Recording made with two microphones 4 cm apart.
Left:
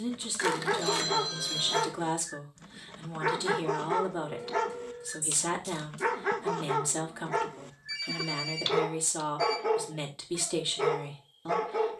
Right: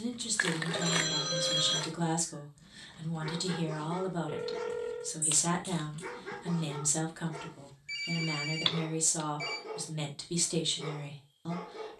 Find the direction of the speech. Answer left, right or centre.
centre.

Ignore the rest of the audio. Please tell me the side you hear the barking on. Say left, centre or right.
left.